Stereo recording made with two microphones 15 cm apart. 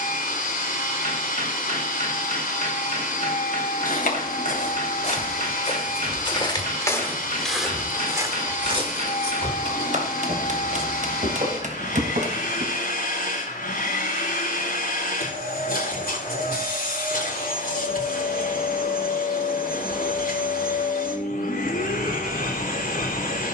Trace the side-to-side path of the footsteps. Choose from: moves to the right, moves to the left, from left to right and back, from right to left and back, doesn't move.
moves to the right.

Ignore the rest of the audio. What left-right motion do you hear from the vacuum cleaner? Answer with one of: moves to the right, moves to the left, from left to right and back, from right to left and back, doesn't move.
doesn't move.